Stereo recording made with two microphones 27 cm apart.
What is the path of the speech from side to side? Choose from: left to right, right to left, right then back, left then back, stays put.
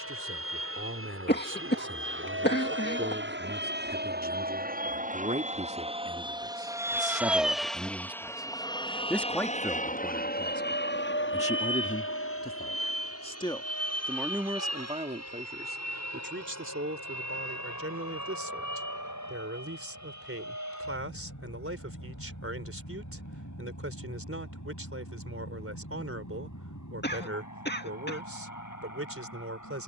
left then back.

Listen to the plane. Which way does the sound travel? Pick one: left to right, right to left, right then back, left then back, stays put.
right to left.